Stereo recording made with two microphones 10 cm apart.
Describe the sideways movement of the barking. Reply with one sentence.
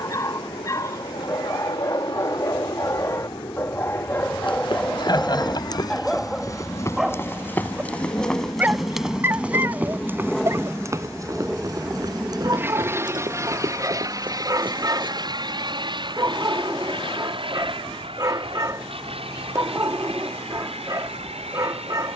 In this clip you hear the barking move to the right.